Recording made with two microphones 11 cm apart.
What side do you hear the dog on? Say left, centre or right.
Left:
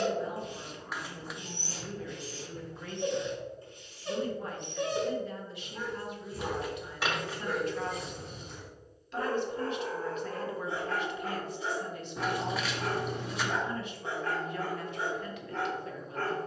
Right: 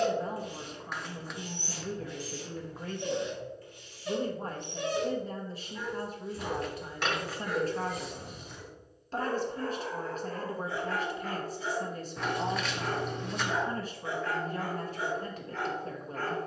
left.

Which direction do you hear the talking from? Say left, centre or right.
right.